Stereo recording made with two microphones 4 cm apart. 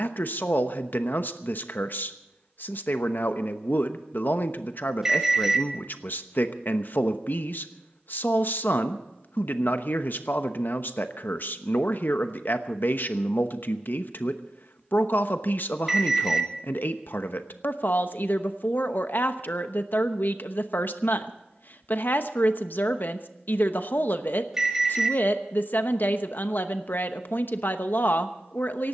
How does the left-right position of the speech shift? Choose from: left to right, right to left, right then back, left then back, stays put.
stays put.